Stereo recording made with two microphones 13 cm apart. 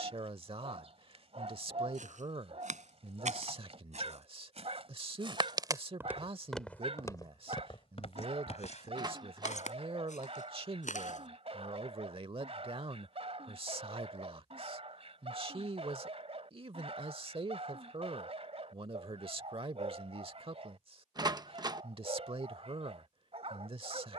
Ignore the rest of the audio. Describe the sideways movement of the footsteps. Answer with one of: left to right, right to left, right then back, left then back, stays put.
right to left.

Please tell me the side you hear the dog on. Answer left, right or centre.
right.